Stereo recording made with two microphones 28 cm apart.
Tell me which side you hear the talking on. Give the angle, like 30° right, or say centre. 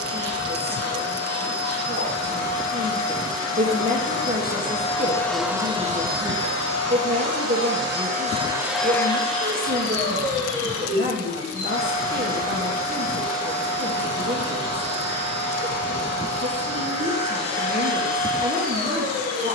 30° right.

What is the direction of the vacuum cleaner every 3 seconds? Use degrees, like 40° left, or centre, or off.
60° left, 30° left, 40° right, 40° left, 60° left, 60° left, 60° left.